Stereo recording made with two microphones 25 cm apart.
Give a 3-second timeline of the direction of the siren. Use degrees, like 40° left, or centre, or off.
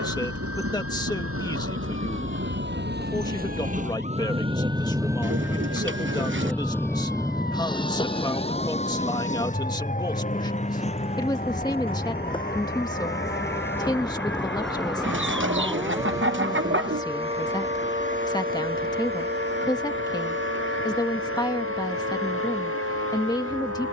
50° left, 50° left, 40° left, 30° left, 10° left, 20° right, 40° right, 60° right.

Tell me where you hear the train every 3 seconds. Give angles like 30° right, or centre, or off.
60° right, 20° right, 10° left, 30° left, 40° left, 50° left, 50° left, 50° left.